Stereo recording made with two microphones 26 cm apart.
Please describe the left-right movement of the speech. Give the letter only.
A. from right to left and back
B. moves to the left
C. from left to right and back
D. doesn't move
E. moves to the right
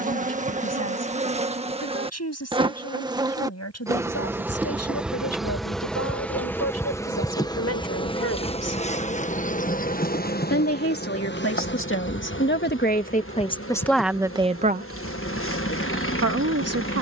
E.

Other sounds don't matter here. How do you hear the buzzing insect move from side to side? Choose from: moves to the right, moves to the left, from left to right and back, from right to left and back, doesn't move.
moves to the left.